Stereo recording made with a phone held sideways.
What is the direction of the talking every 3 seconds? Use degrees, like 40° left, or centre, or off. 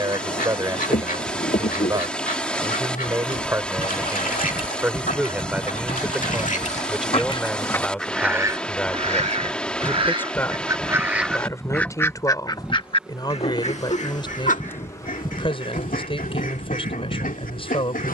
20° right, 10° right, centre, 10° left, 30° left, 40° left.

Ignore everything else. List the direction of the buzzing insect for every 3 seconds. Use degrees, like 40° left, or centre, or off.
60° left, 40° left, 20° left, centre, centre, 50° left.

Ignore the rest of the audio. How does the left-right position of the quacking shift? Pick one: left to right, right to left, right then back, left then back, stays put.
right then back.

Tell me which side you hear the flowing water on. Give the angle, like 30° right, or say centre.
10° left.